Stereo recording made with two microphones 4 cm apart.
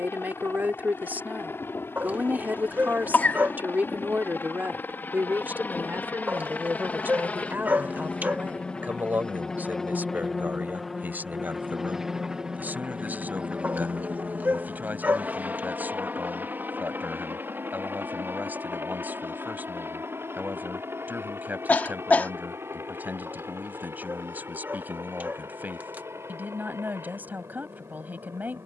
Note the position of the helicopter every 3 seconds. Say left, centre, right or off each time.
left, left, left, centre, right, right, right, right, right, right.